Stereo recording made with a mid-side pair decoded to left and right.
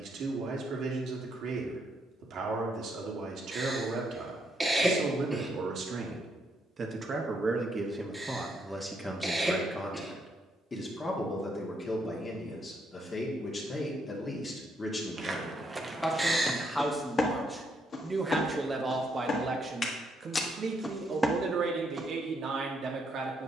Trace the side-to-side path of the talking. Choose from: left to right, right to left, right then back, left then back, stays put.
left then back.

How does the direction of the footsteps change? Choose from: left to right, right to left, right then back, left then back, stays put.
left then back.